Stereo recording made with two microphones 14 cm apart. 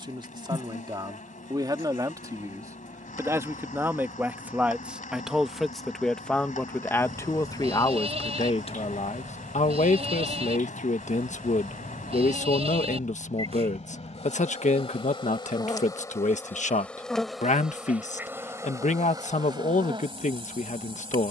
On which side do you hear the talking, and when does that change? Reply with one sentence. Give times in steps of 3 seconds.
In this clip you hear the talking on the right from 0 s, in the centre from 3 s and on the left from 6 s.